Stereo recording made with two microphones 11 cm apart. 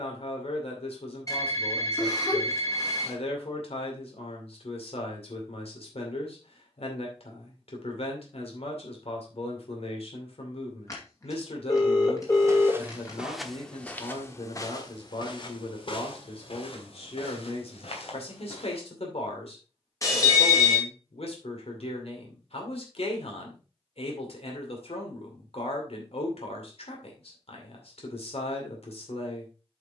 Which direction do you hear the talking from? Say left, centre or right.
left.